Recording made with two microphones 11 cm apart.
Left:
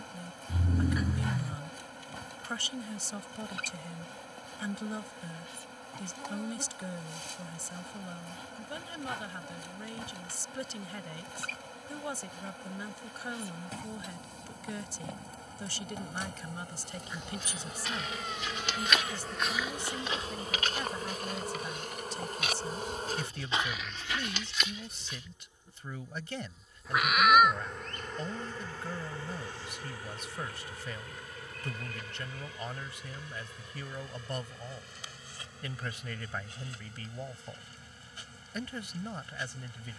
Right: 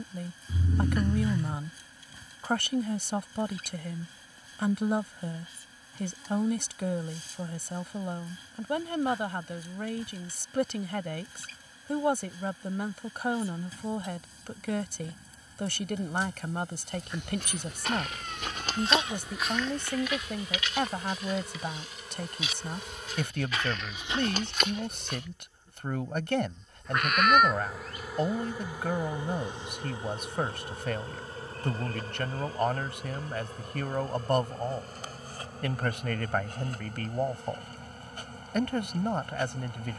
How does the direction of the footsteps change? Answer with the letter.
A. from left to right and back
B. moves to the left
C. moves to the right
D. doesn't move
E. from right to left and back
E.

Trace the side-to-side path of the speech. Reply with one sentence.
You can hear the speech stay put.